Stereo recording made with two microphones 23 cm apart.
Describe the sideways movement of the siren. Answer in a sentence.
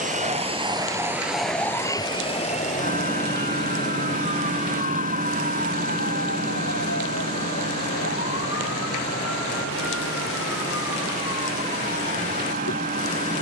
You can hear the siren go from the right side to the left.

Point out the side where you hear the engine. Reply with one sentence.
You can hear the engine on the right.